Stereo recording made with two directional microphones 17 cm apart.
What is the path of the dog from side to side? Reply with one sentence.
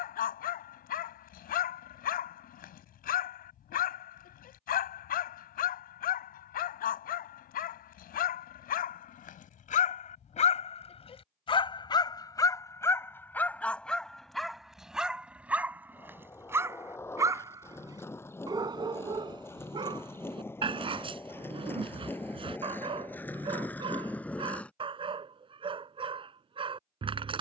In this clip you hear the dog go from the left side to the right.